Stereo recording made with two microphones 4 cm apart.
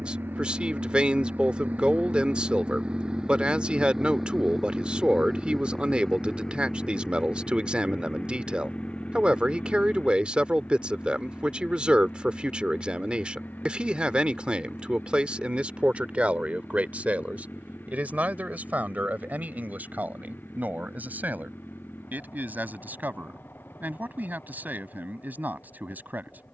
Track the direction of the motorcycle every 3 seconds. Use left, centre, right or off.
right, centre, left, left, left, left, left, left, left.